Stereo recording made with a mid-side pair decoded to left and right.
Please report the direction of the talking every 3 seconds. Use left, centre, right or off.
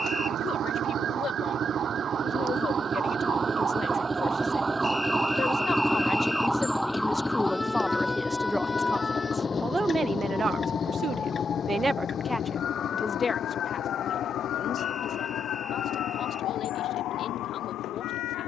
left, left, centre, right, left, left.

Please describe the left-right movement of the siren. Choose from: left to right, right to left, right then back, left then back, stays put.
right to left.